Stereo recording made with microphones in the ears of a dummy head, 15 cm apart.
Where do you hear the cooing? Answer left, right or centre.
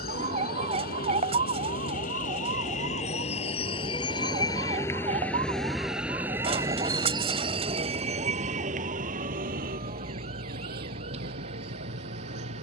right.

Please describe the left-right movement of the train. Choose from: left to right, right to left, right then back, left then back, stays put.
left to right.